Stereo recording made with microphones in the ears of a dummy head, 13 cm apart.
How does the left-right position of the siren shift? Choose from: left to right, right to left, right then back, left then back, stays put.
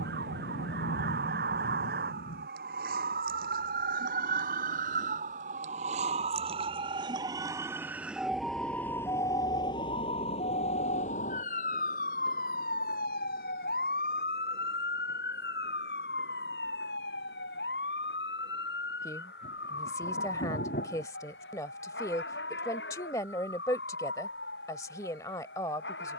right to left.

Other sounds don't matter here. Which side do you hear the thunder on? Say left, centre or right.
left.